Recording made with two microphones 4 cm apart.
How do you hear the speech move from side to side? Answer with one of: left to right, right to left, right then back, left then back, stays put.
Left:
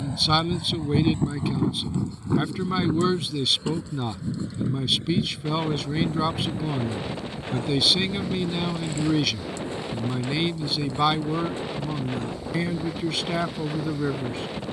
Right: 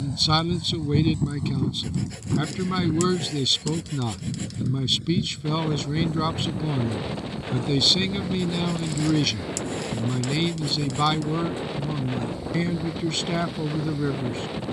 stays put.